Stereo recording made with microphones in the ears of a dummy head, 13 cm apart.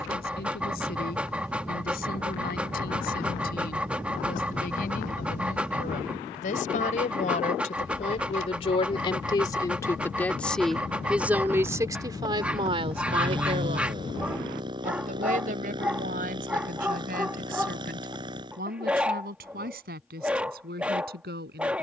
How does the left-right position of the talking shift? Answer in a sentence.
In this clip you hear the talking go from the left side to the right.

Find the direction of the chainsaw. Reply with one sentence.
You can hear the chainsaw on the right.